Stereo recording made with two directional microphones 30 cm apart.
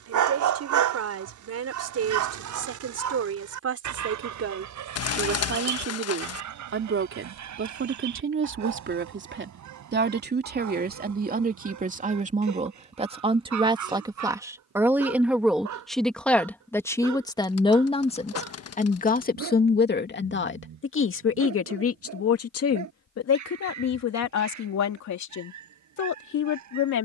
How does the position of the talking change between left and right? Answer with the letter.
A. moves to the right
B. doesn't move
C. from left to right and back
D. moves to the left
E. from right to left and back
D.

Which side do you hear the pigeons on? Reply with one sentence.
In this clip you hear the pigeons on the left.